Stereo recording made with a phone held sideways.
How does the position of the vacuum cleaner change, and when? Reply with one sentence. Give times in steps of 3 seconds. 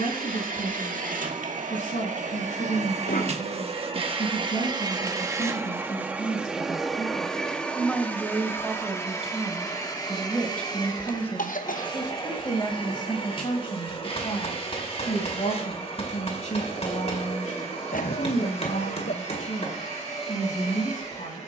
You can hear the vacuum cleaner on the right from 0 s, in the centre from 6 s and on the left from 9 s.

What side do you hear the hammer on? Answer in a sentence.
In this clip you hear the hammer on the left.